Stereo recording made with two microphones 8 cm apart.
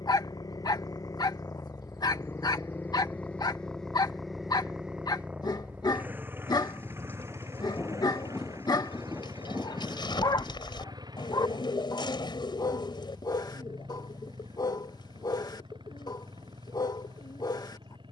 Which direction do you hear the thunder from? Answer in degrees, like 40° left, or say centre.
20° left.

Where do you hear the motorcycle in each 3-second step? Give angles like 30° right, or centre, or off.
40° left, centre, 30° right, 50° right, 60° right, 60° right.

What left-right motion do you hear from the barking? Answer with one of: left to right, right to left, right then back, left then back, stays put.
stays put.